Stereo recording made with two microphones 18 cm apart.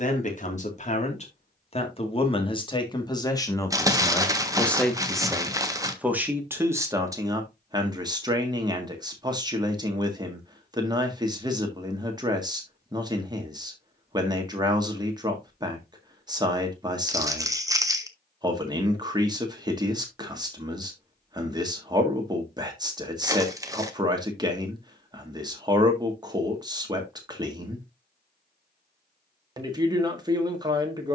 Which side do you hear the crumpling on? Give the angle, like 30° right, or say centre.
20° right.